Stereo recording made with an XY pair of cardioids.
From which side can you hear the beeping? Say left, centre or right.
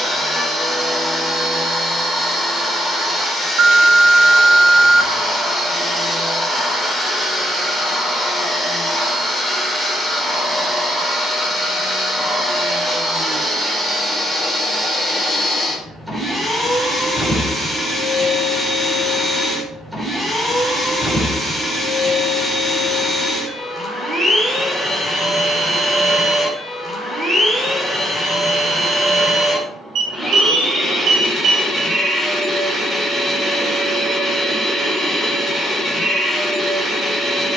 right.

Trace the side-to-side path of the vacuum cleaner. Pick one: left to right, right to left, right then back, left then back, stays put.
stays put.